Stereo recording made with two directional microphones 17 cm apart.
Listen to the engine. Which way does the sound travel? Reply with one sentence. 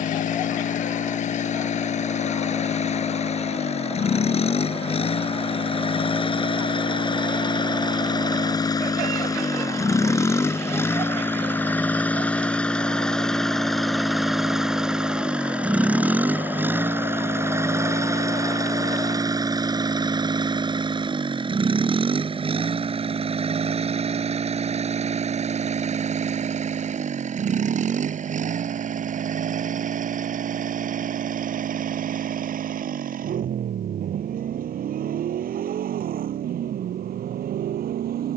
You can hear the engine go from the left side to the right.